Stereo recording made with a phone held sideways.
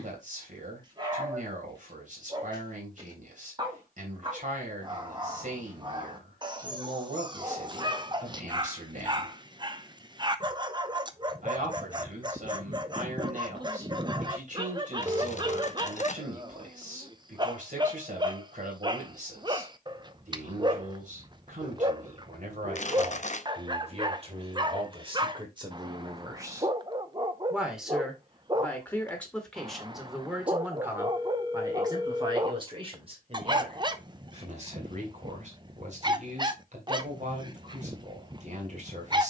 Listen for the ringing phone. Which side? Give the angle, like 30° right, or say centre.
30° right.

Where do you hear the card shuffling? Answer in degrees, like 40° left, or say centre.
50° left.